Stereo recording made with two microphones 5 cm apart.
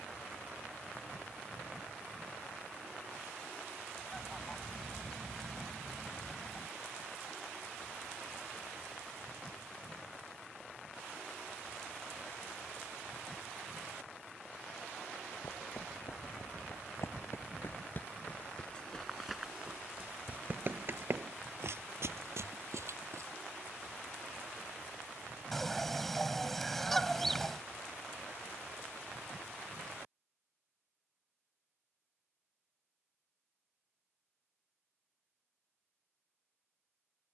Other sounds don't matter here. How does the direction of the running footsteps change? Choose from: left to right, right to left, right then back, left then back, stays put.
left to right.